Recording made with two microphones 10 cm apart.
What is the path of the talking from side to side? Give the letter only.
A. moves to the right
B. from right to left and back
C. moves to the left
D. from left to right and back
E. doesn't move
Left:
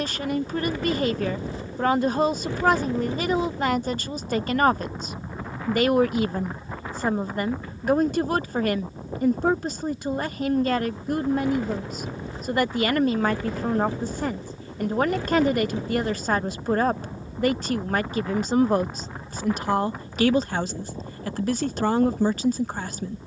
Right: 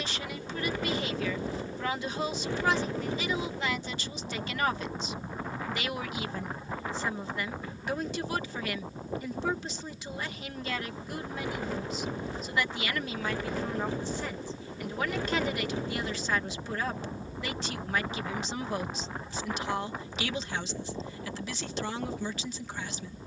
E.